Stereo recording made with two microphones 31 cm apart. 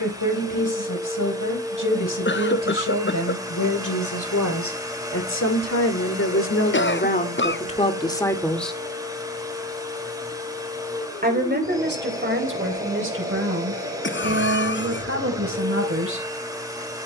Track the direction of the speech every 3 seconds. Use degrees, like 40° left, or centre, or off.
80° left, 70° left, 20° left, 30° right, 40° right, 40° right.